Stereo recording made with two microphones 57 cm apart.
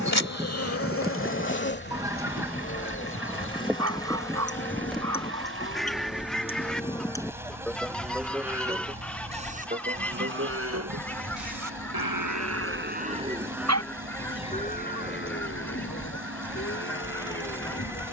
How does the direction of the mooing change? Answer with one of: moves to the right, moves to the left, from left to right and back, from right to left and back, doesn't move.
from left to right and back.